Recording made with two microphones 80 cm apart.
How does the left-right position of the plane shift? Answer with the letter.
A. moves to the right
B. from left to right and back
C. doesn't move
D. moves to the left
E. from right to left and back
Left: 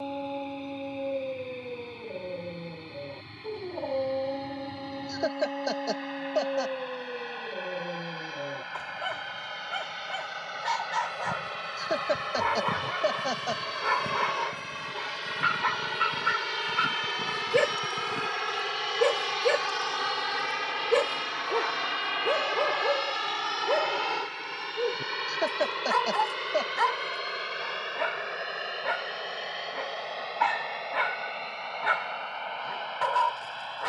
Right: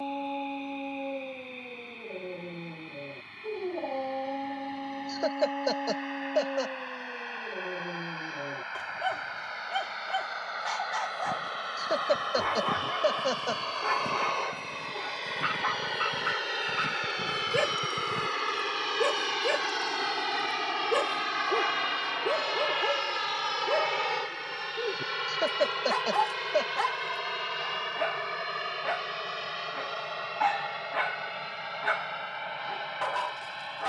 A.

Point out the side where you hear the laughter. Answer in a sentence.
In this clip you hear the laughter in the centre.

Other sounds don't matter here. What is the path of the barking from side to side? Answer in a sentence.
You can hear the barking stay in one place.